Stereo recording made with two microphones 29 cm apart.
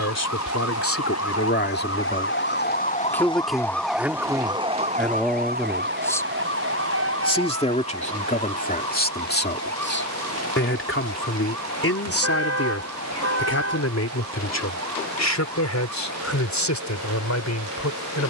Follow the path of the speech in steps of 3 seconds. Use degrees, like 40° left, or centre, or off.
40° left, centre, 20° left, 40° left, 60° left, 70° left.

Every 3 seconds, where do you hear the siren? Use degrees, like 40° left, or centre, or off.
60° left, 10° right, 50° right, 60° right, 60° right, 70° right.